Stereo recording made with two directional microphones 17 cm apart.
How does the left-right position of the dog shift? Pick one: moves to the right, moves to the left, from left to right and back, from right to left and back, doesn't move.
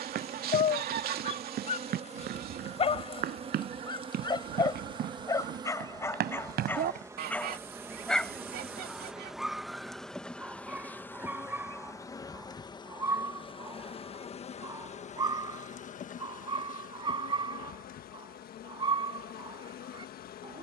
moves to the right.